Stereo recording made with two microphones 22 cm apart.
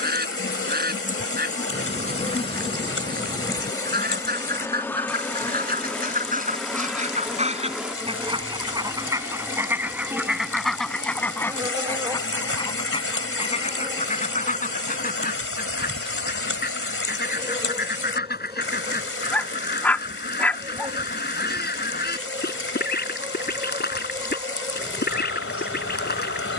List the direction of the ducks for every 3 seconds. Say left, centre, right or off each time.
right, right, right, centre, left, left, left, left, left.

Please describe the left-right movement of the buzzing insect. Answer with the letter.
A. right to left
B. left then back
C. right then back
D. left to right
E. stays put
D.